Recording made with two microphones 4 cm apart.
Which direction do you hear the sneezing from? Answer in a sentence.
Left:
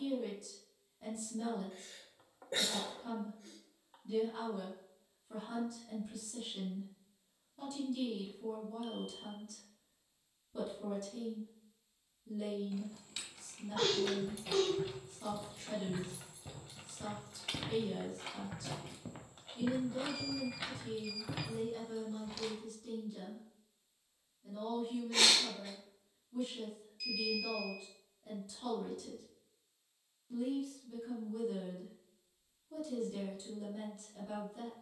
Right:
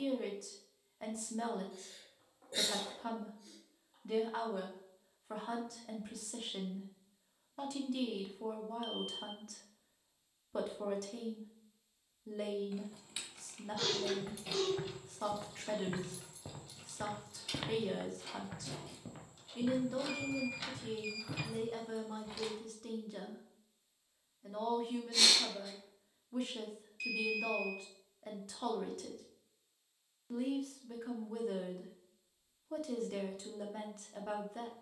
In this clip you hear the sneezing on the left.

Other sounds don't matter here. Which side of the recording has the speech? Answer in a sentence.
In this clip you hear the speech on the right.